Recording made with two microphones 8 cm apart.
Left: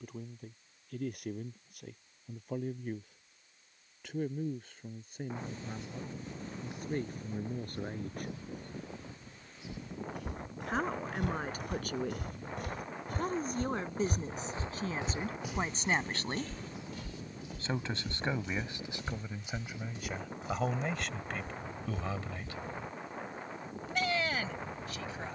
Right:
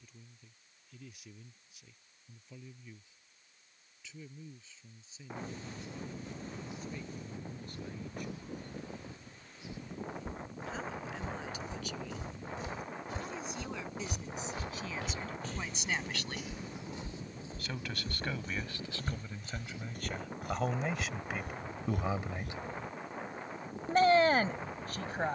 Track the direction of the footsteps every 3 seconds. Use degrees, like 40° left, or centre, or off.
off, off, off, 70° left, 50° left, 10° right, 50° right, 60° right, off.